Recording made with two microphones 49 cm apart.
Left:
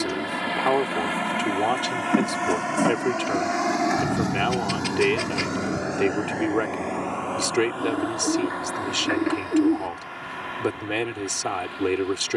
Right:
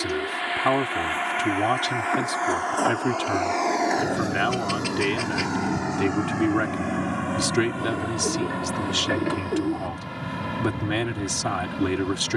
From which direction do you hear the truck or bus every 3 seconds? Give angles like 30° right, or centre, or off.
60° left, 10° left, 40° right, 60° right.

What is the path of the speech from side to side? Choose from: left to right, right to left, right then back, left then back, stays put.
stays put.